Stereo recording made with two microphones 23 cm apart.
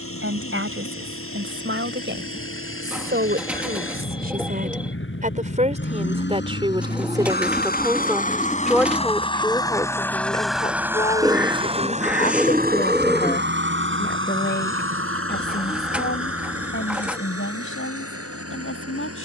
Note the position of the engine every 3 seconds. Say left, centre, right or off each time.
left, left, left, centre, right, right, right.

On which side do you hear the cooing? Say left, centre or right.
centre.